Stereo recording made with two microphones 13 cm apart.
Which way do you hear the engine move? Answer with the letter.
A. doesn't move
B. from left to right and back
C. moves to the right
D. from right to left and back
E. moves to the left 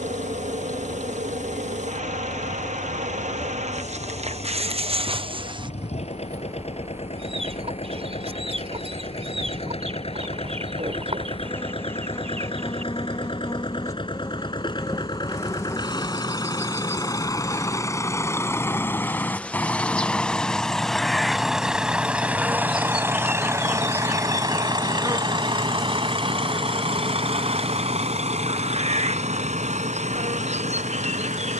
C.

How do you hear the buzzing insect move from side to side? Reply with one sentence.
In this clip you hear the buzzing insect go left and come back.